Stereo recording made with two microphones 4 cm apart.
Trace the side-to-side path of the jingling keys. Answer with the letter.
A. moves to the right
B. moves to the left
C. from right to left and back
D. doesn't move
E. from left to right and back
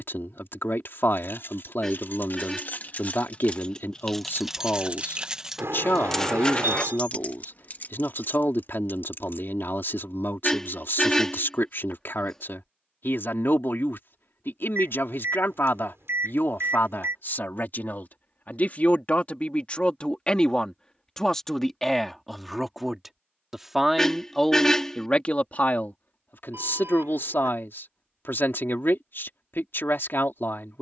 E.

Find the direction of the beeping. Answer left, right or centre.
right.